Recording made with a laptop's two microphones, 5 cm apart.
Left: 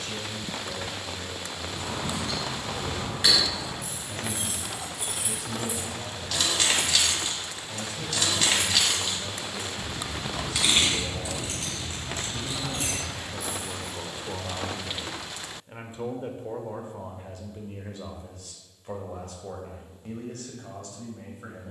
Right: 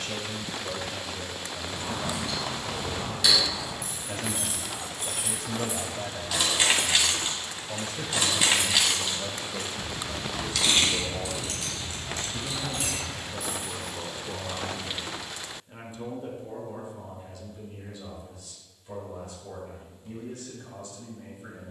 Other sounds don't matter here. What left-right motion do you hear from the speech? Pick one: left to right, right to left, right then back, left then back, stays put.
right to left.